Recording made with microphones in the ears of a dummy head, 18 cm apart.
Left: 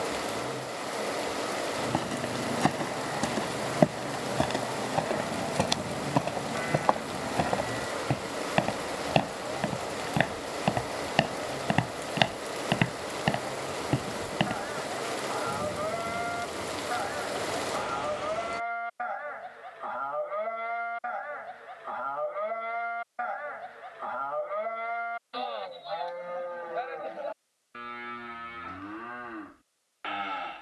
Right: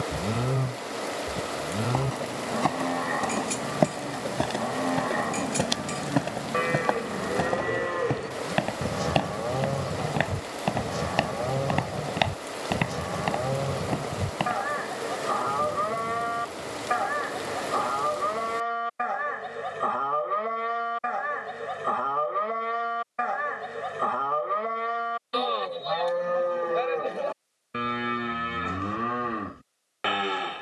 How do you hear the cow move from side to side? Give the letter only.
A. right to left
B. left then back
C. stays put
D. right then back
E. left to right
C.